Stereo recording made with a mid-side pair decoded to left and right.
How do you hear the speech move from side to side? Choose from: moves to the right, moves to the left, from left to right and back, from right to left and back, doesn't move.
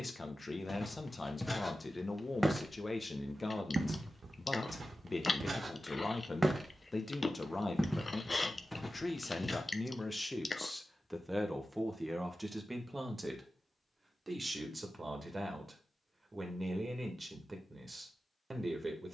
moves to the right.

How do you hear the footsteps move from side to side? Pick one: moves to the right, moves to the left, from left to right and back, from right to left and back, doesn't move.
from left to right and back.